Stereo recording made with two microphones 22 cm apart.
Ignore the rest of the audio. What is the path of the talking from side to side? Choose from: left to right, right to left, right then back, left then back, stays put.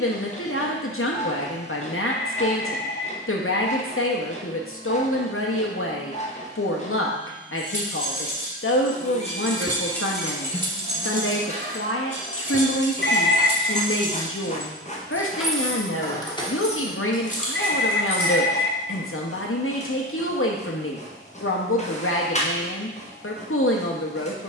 stays put.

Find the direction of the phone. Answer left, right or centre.
left.